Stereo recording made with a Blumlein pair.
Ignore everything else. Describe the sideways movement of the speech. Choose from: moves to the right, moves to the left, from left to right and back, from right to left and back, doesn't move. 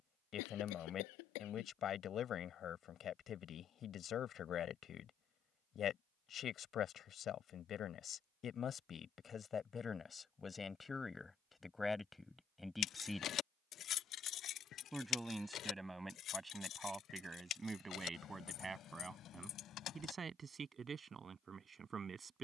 moves to the right.